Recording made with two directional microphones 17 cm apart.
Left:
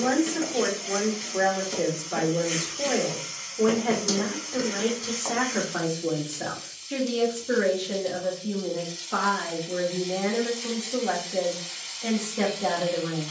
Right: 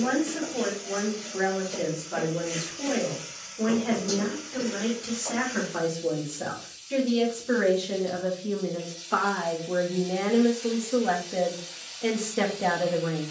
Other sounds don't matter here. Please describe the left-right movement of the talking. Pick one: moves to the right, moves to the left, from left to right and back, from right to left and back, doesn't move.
moves to the right.